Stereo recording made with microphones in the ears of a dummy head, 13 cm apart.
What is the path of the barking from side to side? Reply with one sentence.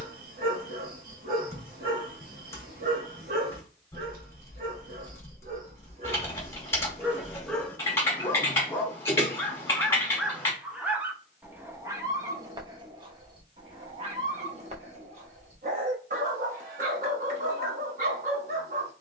In this clip you hear the barking move from right to left and back again.